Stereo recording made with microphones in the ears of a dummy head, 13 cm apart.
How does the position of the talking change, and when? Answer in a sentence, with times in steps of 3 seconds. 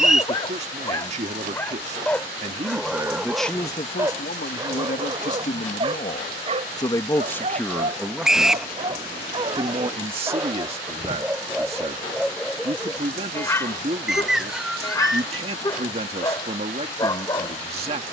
You can hear the talking on the right from 0 s, on the left from 3 s, in the centre from 6 s and on the right from 9 s.